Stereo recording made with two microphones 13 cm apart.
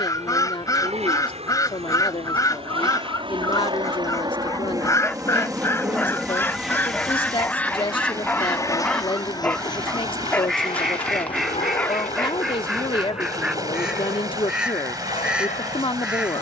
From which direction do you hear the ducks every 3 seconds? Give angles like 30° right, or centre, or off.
30° left, 20° left, 10° left, centre, centre, 10° right.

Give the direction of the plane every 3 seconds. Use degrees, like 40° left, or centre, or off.
60° right, 30° right, 10° left, 40° left, 50° left, 60° left.